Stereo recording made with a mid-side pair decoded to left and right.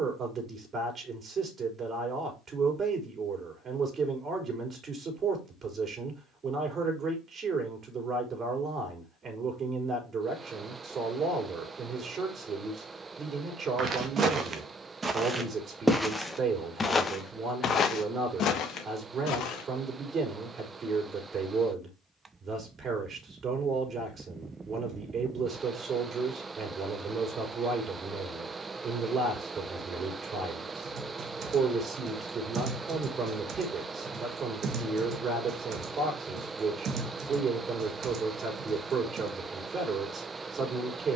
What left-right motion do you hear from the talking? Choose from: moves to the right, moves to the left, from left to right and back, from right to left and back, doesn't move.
doesn't move.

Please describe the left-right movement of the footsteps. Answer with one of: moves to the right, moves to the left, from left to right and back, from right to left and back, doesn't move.
moves to the left.